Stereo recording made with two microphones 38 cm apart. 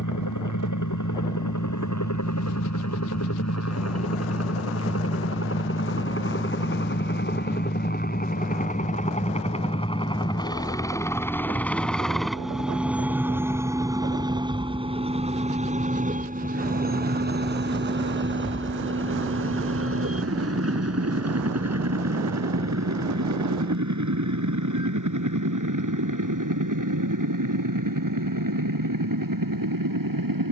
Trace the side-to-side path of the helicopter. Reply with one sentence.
In this clip you hear the helicopter go from the left side to the right.